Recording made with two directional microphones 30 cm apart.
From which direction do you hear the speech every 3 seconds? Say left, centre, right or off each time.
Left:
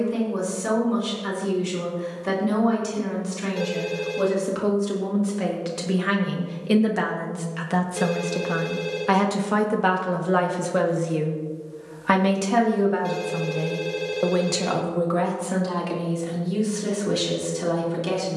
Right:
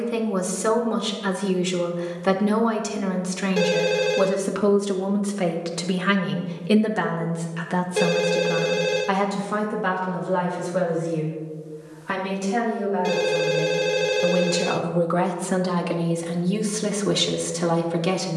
right, right, centre, left, left, right.